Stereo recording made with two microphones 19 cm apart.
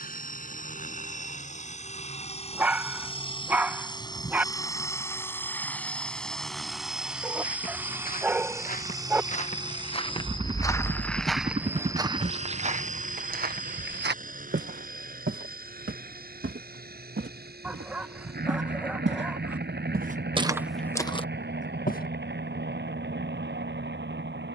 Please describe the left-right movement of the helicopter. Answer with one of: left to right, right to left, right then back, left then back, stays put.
left to right.